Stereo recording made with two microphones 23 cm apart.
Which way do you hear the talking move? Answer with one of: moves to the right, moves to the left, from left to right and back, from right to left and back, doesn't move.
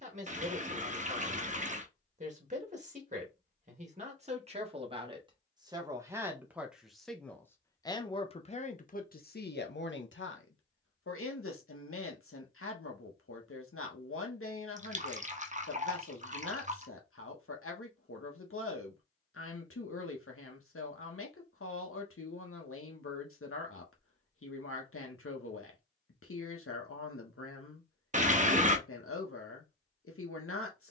moves to the left.